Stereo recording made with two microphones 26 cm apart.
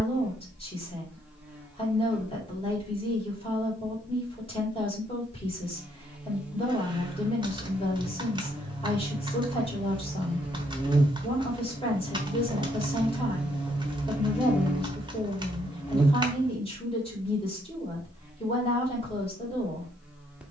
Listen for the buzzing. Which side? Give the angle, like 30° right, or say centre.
centre.